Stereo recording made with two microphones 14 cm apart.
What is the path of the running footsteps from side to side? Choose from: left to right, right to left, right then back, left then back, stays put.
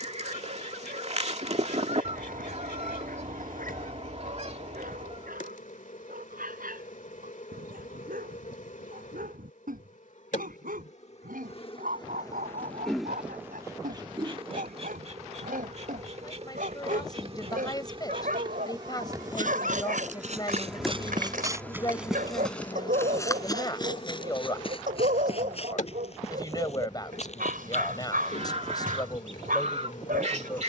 right to left.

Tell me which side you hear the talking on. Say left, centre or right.
left.